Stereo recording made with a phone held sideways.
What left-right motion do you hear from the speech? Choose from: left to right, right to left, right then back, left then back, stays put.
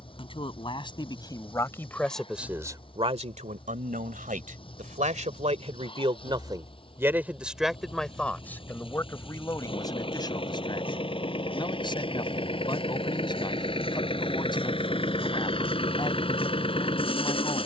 right then back.